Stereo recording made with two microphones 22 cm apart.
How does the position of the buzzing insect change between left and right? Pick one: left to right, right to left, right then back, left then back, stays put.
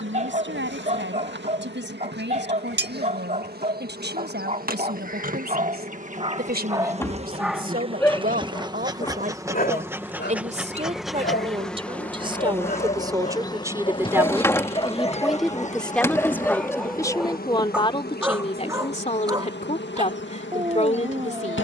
right to left.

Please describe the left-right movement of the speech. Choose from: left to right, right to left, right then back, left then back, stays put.
right to left.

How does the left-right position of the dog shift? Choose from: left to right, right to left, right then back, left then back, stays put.
left then back.